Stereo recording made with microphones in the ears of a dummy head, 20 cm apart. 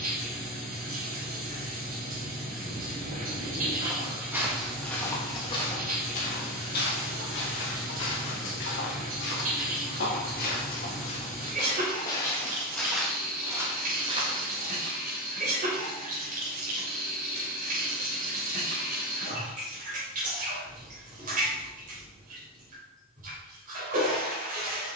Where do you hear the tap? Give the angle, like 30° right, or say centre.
40° right.